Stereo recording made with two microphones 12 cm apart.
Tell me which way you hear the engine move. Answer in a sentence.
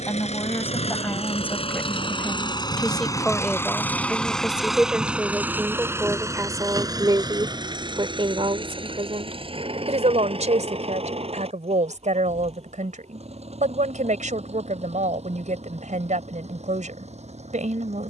You can hear the engine move from left to right.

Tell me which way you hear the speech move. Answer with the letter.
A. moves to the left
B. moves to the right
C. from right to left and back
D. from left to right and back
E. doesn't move
B.